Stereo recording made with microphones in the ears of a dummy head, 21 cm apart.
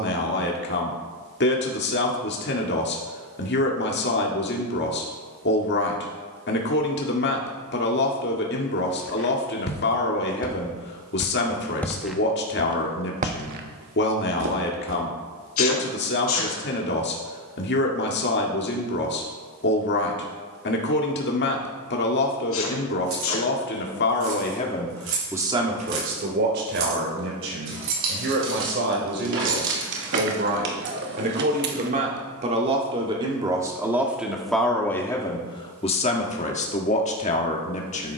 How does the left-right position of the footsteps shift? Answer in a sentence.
In this clip you hear the footsteps travel towards the right.